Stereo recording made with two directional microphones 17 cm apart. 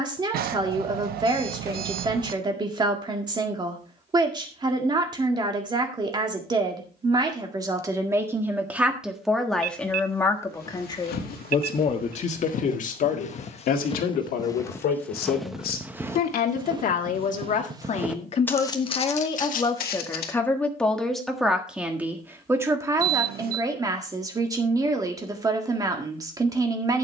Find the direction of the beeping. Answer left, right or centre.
right.